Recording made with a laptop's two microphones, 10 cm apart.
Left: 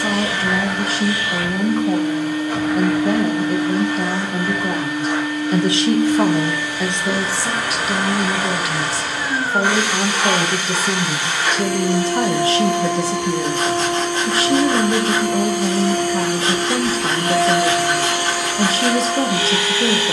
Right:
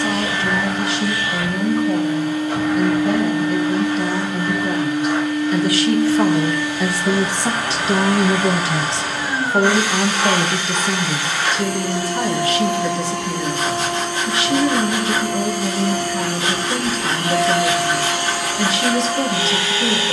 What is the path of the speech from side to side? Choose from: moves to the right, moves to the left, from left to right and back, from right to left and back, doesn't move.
from left to right and back.